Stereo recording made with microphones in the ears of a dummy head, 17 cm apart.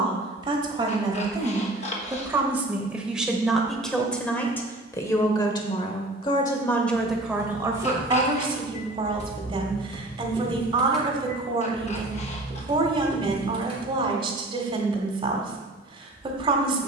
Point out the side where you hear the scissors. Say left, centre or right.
left.